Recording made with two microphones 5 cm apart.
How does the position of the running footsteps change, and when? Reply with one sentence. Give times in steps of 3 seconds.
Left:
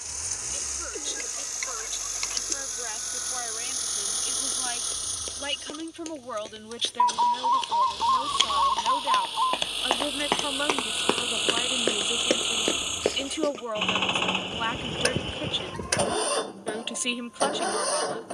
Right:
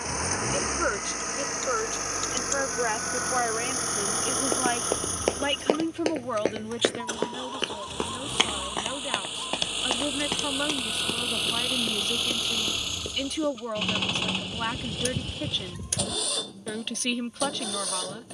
In this clip you hear the running footsteps not at all from 0 s, on the right from 3 s, on the left from 9 s and not at all from 15 s.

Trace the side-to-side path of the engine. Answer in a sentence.
You can hear the engine move to the left.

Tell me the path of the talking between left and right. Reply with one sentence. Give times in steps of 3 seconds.
In this clip you hear the talking on the right from 0 s and in the centre from 6 s.